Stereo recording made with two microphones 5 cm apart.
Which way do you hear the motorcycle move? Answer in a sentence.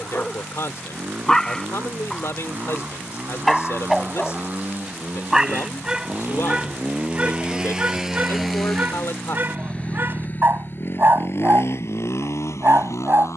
You can hear the motorcycle move from right to left.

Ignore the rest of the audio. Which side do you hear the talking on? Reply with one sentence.
You can hear the talking on the left.